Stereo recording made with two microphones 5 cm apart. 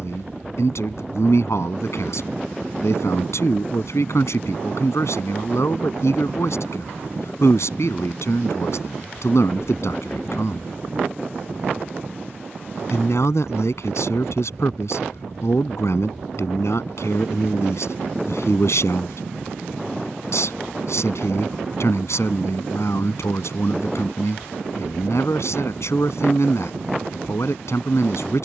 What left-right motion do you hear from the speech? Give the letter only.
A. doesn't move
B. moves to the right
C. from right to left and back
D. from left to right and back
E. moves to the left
A.